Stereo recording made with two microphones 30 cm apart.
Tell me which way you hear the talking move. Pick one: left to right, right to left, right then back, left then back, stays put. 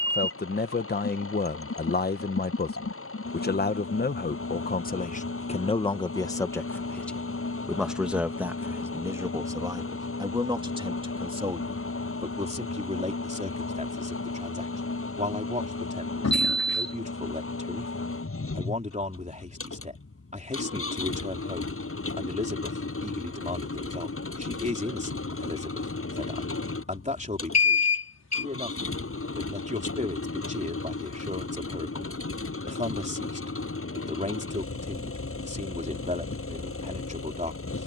left to right.